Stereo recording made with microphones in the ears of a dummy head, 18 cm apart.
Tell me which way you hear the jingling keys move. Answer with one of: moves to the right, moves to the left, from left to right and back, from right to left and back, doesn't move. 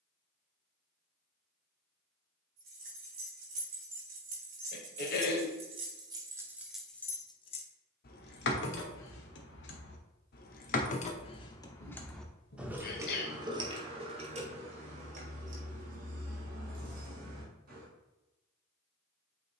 from right to left and back.